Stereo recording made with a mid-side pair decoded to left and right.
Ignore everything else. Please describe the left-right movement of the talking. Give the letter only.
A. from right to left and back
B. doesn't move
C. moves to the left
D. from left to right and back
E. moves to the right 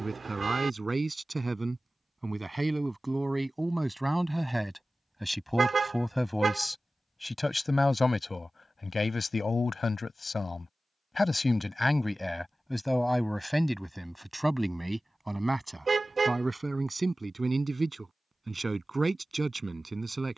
A.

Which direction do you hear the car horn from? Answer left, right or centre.
right.